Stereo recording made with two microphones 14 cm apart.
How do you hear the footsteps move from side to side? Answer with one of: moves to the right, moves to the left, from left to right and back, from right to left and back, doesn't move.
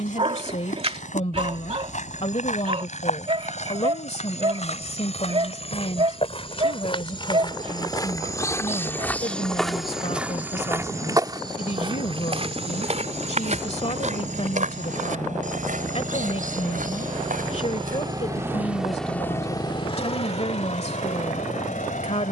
moves to the right.